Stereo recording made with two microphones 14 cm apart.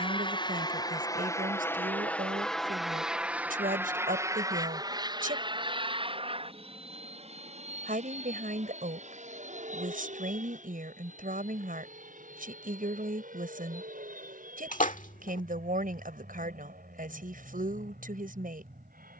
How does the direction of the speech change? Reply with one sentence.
You can hear the speech stay put.